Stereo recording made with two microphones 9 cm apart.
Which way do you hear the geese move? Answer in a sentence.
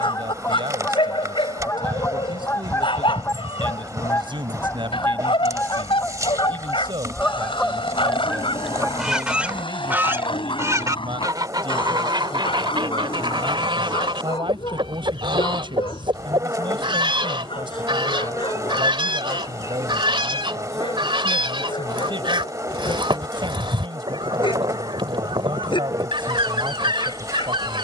You can hear the geese go from the left side to the right.